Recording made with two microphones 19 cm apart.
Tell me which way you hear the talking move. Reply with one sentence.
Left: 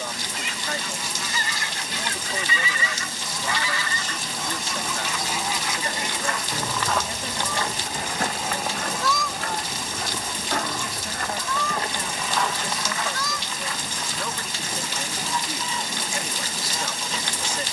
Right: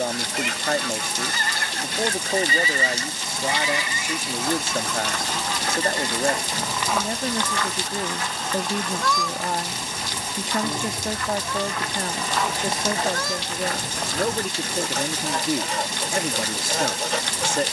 You can hear the talking stay put.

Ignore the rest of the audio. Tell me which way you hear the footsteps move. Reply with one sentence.
In this clip you hear the footsteps go left and come back.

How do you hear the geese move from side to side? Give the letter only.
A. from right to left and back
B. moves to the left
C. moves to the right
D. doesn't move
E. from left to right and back
A.